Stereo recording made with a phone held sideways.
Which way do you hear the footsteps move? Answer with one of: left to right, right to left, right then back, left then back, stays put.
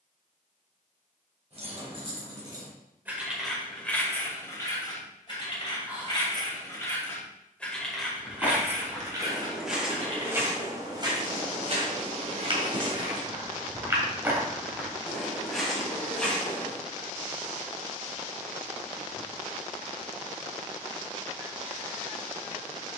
right then back.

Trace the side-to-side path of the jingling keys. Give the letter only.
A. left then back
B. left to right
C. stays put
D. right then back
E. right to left
A.